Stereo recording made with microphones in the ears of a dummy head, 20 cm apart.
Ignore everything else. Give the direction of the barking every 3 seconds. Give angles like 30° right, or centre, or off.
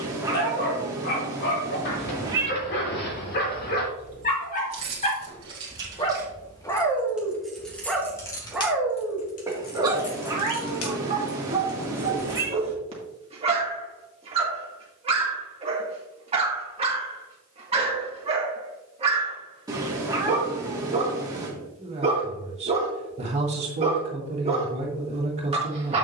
50° left, 40° left, 10° left, 20° right, 20° right, 20° right, 20° right, 20° right, 20° right.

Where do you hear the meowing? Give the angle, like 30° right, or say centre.
20° right.